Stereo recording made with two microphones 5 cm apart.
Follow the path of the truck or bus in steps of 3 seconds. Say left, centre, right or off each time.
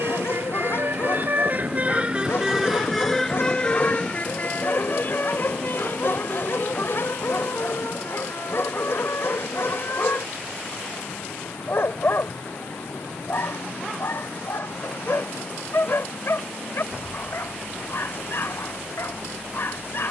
right, left, left, left, left, left, left.